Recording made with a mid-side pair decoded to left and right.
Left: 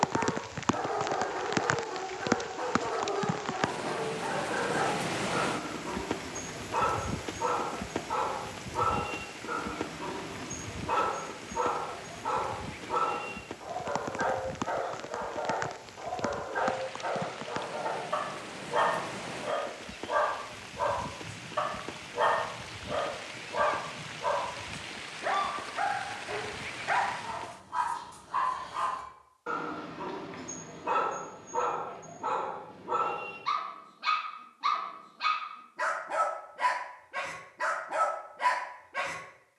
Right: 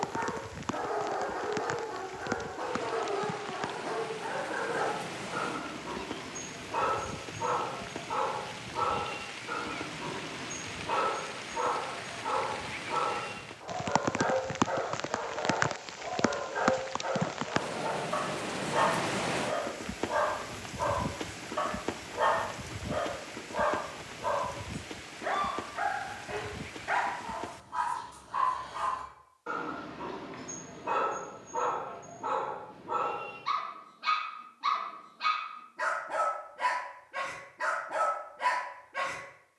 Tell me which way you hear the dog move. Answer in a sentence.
In this clip you hear the dog stay in one place.